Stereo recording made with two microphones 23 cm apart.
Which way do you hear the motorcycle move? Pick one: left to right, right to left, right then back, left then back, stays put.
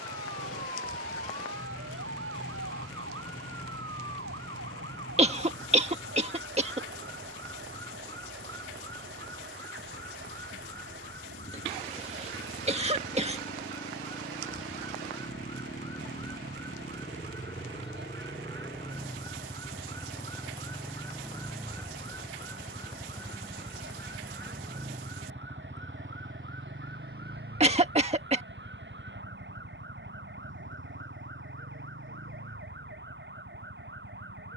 left to right.